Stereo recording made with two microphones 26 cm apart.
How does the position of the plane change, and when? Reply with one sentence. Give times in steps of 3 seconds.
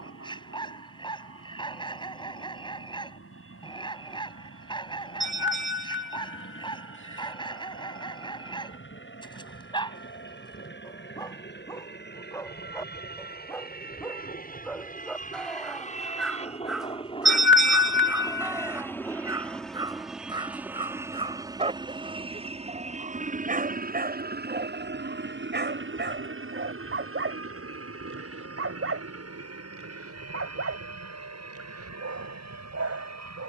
You can hear the plane on the left from 0 s, in the centre from 18 s and on the right from 21 s.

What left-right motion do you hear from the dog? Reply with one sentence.
In this clip you hear the dog move to the right.